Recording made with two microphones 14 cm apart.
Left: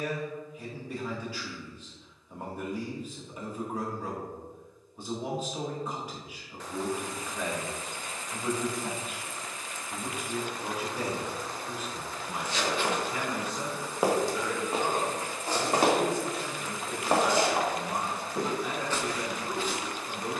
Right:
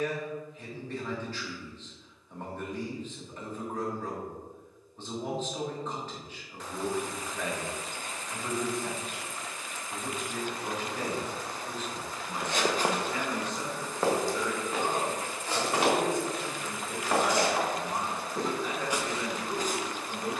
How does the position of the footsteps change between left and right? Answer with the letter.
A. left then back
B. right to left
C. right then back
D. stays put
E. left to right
A.